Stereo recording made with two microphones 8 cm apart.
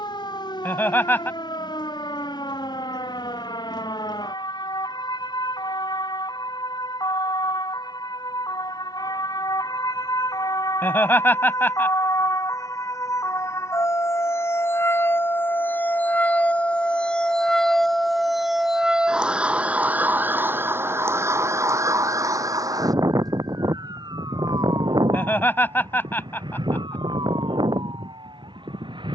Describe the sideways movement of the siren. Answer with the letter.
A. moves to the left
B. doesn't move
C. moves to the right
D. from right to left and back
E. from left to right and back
C.